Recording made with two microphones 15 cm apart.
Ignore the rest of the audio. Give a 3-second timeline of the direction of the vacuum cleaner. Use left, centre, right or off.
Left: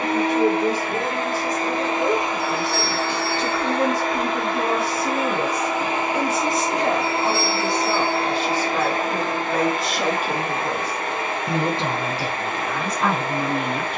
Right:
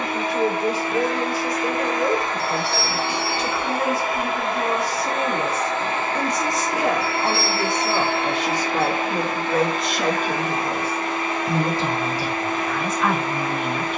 left, centre, left, left, left.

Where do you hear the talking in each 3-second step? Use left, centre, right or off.
left, left, centre, centre, left.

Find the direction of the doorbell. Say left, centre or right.
left.